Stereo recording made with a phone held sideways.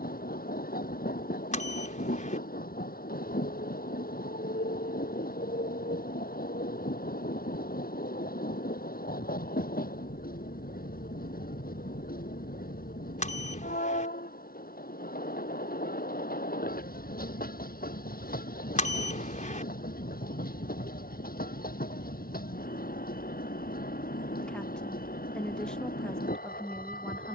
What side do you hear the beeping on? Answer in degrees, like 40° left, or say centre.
50° left.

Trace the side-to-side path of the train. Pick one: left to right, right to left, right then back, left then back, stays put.
stays put.